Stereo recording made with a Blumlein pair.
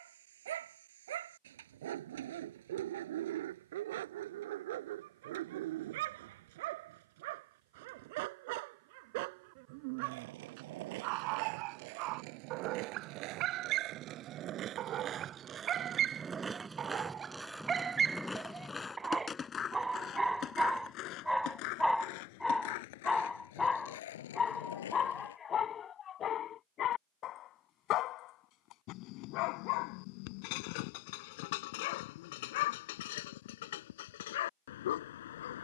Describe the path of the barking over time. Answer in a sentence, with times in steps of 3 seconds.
In this clip you hear the barking on the right from 0 s, in the centre from 18 s and on the left from 24 s.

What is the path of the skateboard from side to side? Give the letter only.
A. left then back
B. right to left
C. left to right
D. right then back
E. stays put
B.